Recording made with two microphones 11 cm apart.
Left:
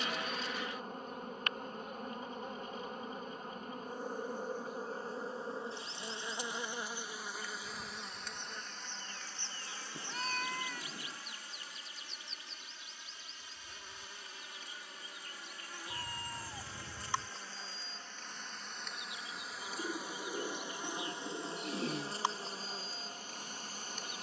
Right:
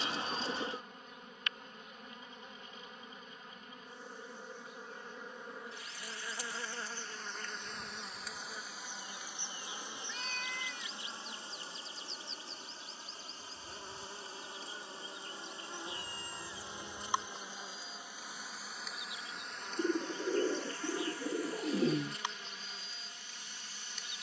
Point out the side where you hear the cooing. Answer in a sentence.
In this clip you hear the cooing on the right.